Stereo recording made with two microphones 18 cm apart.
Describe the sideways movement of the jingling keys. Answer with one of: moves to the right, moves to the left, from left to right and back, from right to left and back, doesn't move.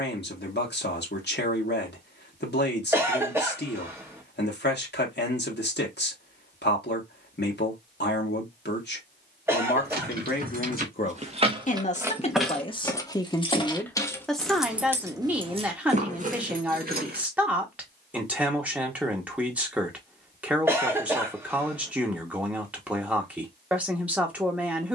from right to left and back.